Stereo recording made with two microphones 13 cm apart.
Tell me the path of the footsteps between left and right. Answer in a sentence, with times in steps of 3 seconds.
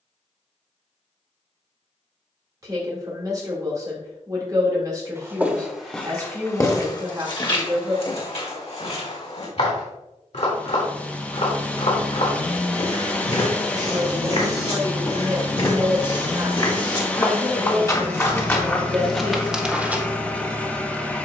In this clip you hear the footsteps not at all from 0 s, in the centre from 3 s, on the left from 6 s and in the centre from 18 s.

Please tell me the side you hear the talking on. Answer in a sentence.
You can hear the talking on the right.